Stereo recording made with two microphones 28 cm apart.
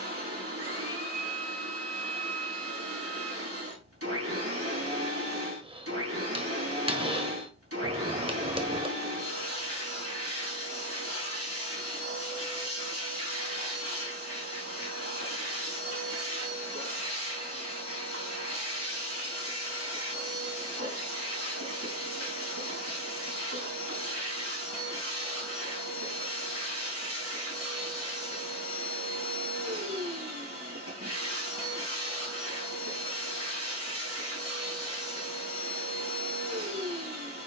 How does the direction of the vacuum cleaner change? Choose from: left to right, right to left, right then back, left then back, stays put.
stays put.